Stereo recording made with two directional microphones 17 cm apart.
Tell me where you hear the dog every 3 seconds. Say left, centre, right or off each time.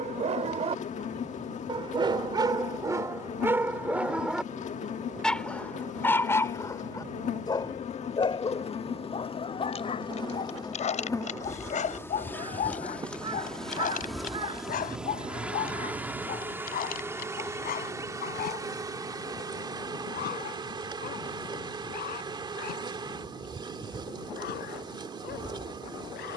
right, centre, left, left, left, left, left, left, left.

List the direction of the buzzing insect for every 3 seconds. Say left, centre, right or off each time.
left, left, left, left, centre, centre, right, right, right.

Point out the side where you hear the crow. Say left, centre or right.
right.